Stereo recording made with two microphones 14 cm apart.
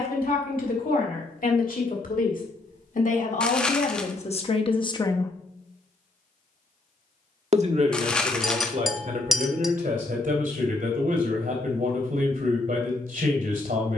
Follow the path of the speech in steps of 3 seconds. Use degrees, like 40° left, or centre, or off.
70° left, 50° left, 50° right, 70° right, 70° right.